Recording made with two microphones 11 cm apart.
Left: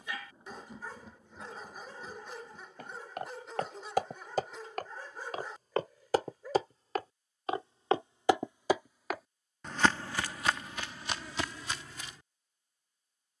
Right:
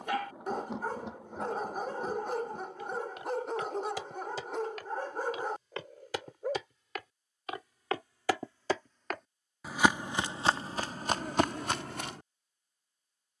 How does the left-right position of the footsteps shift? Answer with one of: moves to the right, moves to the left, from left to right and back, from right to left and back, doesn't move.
moves to the right.